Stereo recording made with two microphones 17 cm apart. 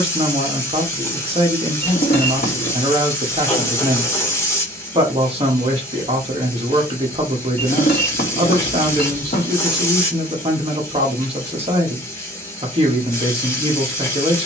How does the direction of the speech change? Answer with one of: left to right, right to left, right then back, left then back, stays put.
stays put.